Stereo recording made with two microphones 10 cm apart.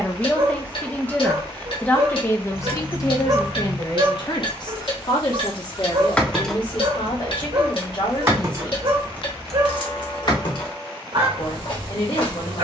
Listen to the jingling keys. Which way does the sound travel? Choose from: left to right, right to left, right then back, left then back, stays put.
right then back.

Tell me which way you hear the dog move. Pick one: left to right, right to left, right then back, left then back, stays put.
stays put.